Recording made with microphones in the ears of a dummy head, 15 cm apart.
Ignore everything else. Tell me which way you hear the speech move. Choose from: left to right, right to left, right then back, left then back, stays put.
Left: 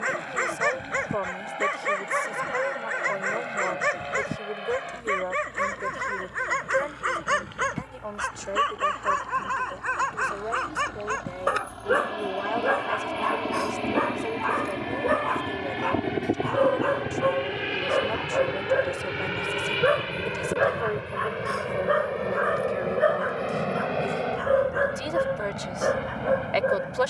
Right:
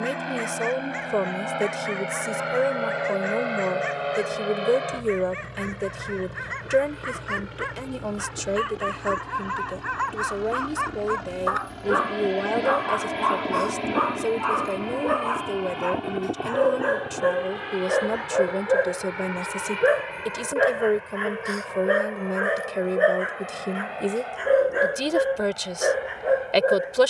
stays put.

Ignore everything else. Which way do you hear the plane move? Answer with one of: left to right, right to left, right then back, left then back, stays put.
right to left.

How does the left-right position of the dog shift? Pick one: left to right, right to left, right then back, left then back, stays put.
left to right.